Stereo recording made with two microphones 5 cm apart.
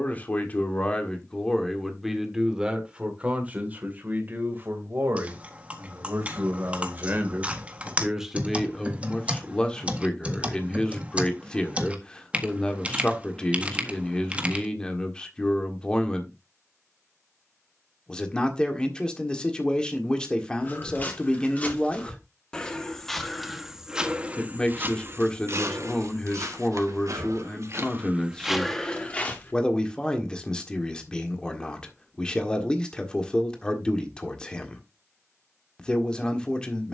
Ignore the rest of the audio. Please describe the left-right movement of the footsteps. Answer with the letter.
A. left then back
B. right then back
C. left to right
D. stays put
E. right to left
B.